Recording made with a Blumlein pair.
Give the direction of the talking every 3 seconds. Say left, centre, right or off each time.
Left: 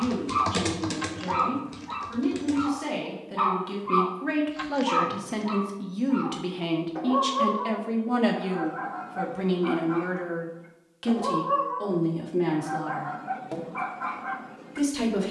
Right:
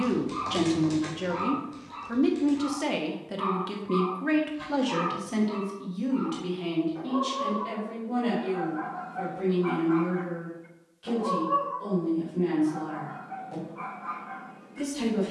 right, centre, left, left, left.